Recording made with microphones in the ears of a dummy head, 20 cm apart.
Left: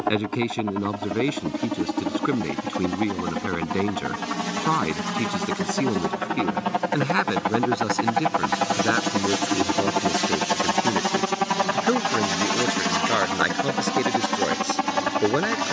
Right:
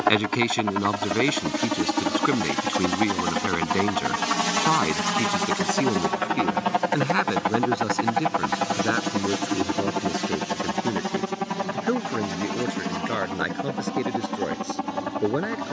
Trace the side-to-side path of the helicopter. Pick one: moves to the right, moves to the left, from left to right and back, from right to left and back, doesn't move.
moves to the left.